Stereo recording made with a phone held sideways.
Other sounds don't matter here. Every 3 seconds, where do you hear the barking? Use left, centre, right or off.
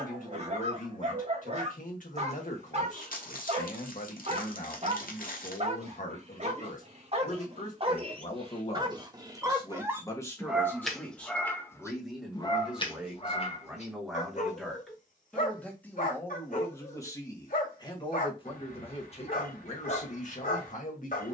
right, right, right, centre, left, left, left.